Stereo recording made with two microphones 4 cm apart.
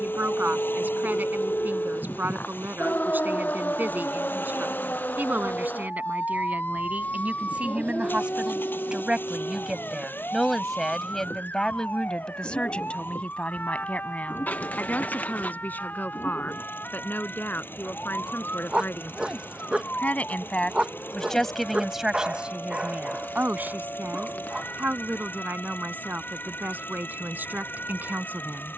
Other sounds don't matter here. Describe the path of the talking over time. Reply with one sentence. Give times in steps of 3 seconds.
You can hear the talking on the right from 0 s, in the centre from 9 s, on the left from 12 s and on the right from 21 s.